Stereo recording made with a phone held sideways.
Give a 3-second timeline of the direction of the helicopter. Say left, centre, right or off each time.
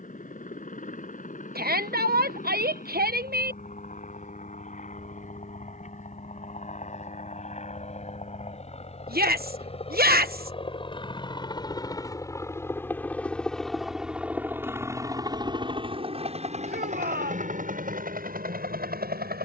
left, left, left, left, centre, right, right.